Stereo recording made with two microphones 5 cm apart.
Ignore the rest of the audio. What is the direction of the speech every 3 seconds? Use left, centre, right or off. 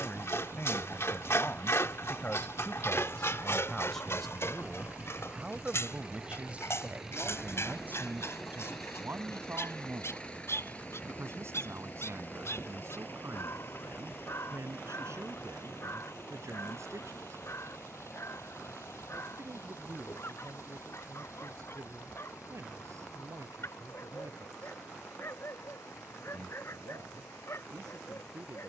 left, centre, right, right, right, right, right, right, right, right.